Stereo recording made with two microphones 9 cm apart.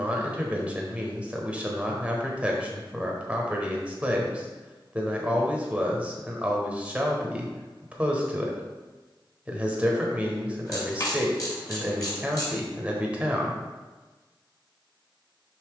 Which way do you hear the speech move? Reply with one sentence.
In this clip you hear the speech stay put.